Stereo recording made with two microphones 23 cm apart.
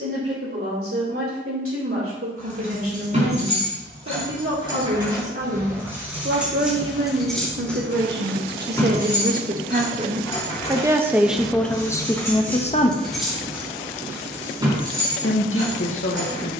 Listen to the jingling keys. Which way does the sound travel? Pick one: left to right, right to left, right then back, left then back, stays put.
left then back.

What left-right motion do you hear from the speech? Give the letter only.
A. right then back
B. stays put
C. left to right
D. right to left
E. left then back
D.